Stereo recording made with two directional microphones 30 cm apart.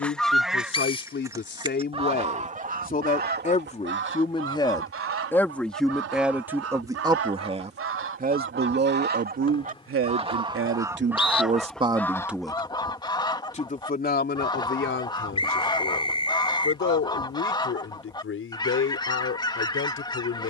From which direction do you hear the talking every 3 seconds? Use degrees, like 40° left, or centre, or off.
40° left, 10° left, 20° right, 40° right, 20° left, 40° left, 40° left.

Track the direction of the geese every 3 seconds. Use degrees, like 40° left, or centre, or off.
10° right, 40° right, 50° right, 10° right, 10° left, 10° left, 10° left.